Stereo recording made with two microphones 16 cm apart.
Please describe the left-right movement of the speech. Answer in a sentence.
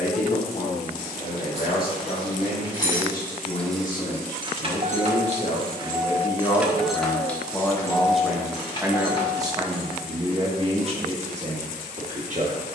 You can hear the speech travel towards the right.